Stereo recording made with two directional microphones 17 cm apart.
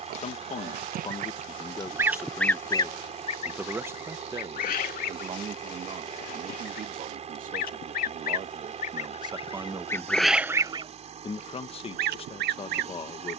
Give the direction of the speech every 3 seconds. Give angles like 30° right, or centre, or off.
30° left, 30° right, 50° right, centre, 30° left.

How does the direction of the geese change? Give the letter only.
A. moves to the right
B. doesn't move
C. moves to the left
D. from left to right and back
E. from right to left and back
E.